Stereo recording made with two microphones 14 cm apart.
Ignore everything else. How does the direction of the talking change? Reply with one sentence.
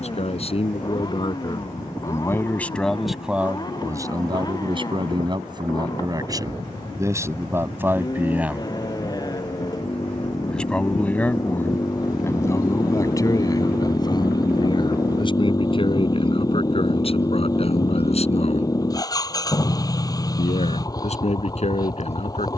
You can hear the talking move from left to right and back again.